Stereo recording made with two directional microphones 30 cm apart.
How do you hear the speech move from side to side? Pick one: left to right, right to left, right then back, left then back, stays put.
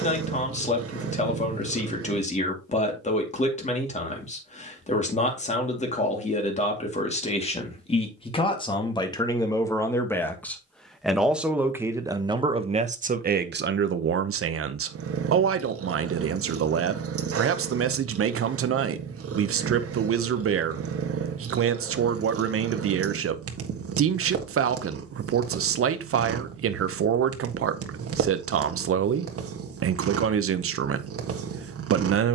left to right.